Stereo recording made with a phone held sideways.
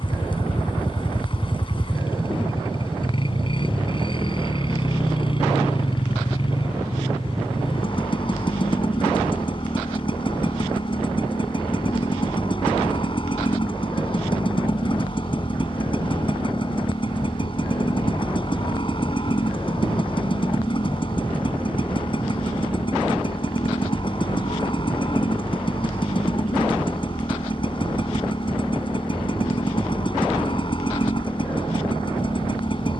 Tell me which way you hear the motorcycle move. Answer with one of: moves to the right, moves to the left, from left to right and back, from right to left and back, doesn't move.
doesn't move.